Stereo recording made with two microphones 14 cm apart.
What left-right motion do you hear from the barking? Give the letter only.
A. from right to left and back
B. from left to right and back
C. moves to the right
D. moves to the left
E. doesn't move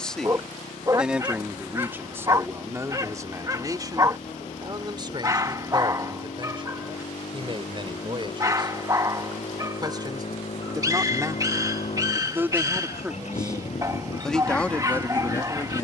E.